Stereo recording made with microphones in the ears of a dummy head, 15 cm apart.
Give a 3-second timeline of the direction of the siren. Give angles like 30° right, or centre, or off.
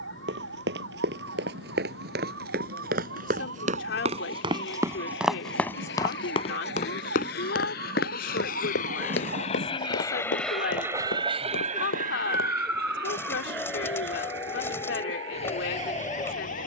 80° right, 80° right, 70° right, 60° right, 10° left, 40° left.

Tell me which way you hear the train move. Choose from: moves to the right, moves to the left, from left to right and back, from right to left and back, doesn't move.
moves to the right.